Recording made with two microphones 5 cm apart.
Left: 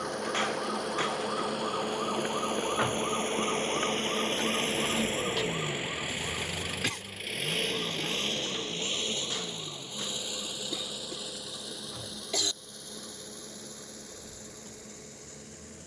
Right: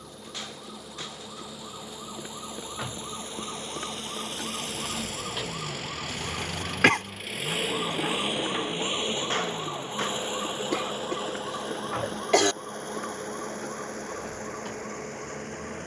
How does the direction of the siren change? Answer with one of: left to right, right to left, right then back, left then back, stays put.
left to right.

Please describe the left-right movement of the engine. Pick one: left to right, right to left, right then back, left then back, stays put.
left to right.